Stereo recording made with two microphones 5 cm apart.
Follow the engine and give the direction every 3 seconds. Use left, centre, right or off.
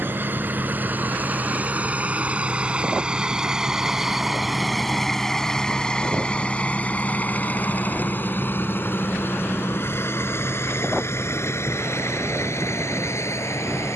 right, centre, left, left, left.